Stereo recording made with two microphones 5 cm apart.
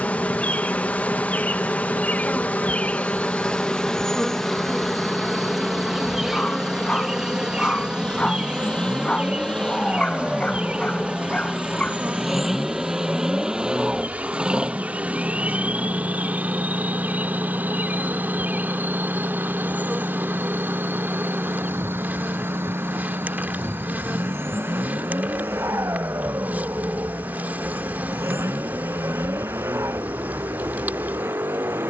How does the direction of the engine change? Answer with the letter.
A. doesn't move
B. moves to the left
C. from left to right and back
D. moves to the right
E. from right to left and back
D.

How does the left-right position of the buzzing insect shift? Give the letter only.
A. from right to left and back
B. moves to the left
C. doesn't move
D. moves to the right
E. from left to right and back
D.